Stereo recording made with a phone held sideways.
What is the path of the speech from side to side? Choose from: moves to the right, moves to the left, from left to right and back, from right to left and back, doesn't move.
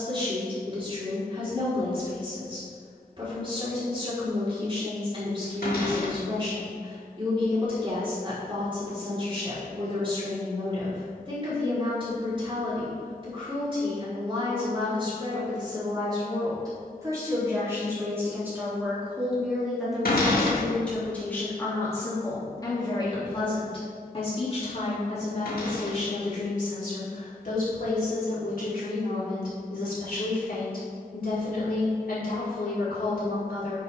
moves to the left.